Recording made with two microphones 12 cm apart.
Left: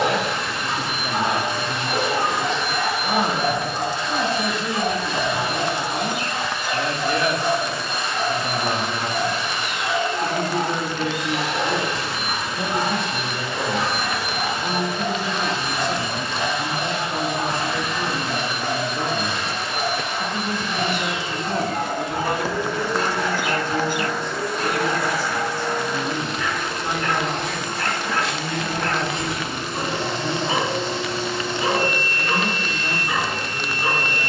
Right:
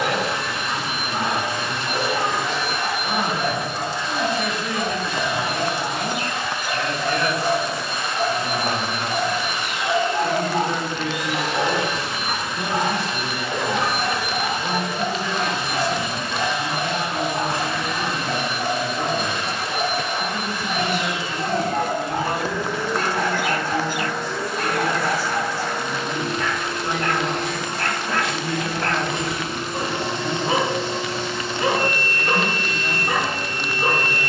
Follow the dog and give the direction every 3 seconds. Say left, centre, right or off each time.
left, left, centre, right, right, right, right, right, right, right, right, right.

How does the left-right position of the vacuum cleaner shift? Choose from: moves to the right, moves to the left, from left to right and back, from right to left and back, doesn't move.
doesn't move.